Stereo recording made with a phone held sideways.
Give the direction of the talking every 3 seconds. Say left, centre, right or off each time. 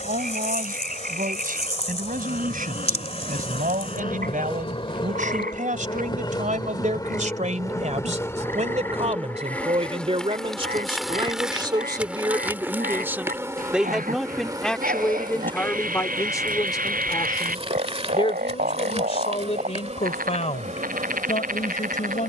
right, right, right, right, centre, left, left, left.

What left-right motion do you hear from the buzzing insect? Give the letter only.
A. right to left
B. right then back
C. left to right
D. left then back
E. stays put
C.